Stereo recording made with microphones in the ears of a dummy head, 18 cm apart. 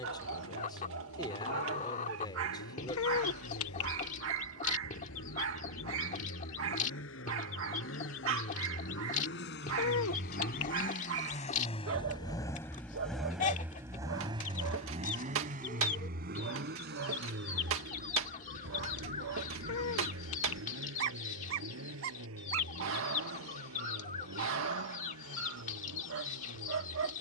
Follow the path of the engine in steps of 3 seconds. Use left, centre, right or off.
left, left, left, left, centre, right, right, right, right.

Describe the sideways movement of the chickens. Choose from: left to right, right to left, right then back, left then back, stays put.
stays put.